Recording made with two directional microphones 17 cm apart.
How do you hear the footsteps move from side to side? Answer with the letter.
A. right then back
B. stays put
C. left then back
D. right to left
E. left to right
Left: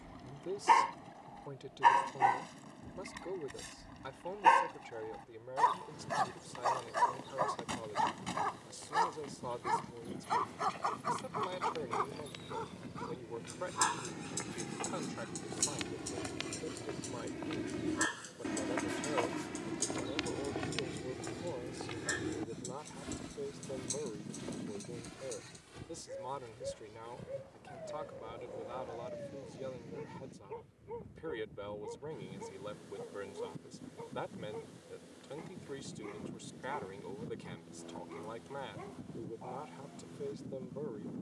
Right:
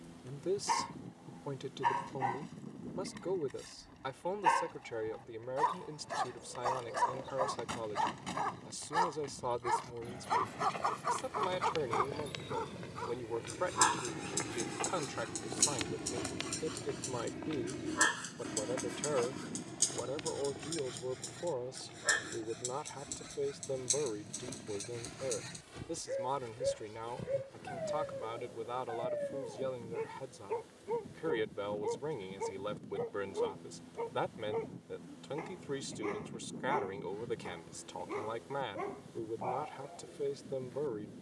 C.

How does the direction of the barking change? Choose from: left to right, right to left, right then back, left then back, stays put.
left to right.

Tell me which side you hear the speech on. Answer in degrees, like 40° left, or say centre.
40° right.